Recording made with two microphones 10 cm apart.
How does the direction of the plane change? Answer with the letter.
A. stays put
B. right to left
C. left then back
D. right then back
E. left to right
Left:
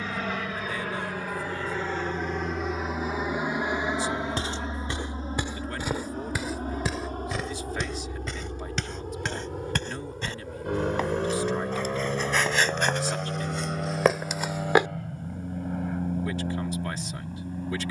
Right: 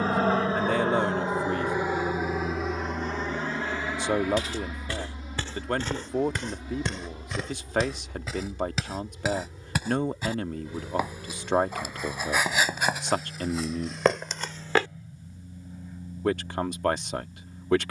B.